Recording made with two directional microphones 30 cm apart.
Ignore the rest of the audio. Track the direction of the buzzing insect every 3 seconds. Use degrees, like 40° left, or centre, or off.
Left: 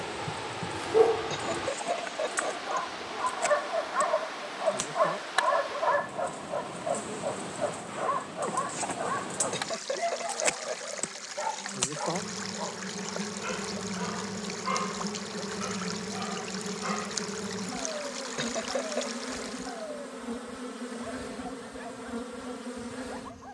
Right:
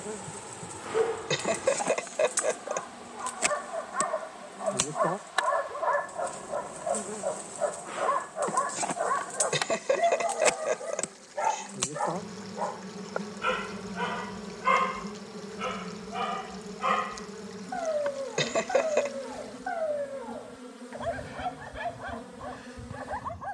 50° right, 40° right, 20° right, centre, 20° left, 30° left, 40° left, 50° left.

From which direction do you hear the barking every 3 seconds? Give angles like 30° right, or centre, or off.
40° left, 20° left, 10° right, 30° right, 50° right, 60° right, 60° right, 70° right.